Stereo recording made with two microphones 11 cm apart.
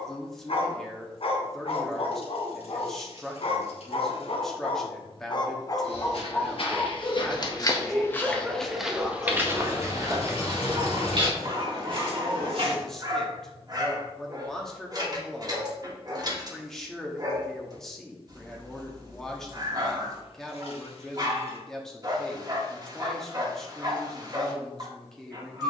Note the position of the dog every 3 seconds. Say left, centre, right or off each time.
left, left, centre, right, right, right, right, right, right.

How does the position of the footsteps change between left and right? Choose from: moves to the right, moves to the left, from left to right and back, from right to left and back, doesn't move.
moves to the right.